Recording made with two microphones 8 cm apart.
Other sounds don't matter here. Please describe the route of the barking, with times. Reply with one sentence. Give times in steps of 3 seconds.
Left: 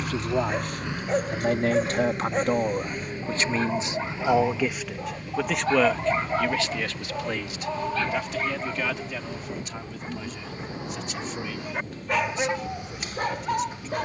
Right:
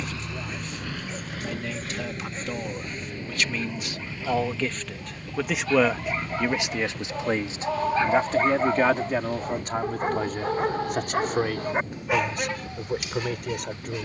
You can hear the barking on the left from 0 s, in the centre from 6 s, on the right from 9 s and on the left from 12 s.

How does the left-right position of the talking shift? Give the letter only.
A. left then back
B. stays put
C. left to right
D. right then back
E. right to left
C.